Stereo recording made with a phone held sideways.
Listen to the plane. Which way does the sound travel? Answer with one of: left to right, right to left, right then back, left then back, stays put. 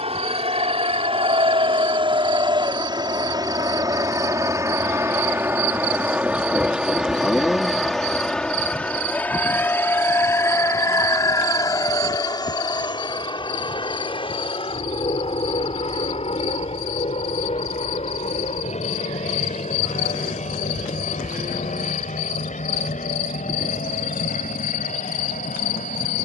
right to left.